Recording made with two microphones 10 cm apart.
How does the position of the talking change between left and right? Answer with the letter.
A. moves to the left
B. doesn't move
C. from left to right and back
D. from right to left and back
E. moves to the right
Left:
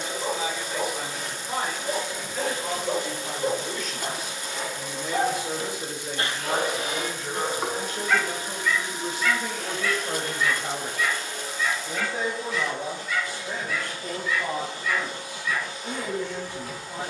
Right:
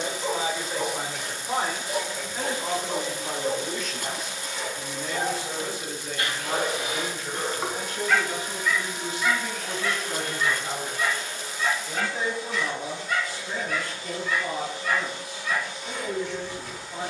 A.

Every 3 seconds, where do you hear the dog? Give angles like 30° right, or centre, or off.
70° left, 50° left, 10° left, 30° right, 50° right, 50° right.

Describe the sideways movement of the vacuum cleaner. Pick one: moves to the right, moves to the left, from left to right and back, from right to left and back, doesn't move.
doesn't move.